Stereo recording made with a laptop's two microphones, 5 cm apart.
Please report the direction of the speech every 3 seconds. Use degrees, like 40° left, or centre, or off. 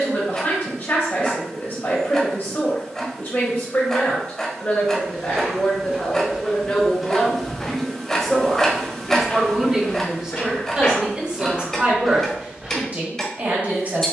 50° left, 40° left, 20° left, 20° right, 40° right.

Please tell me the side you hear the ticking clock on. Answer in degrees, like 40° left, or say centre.
10° left.